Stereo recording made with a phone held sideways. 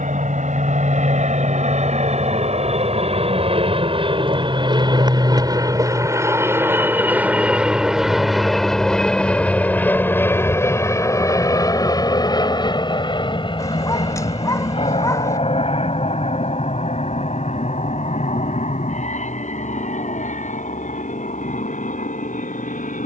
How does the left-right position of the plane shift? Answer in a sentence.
In this clip you hear the plane travel towards the left.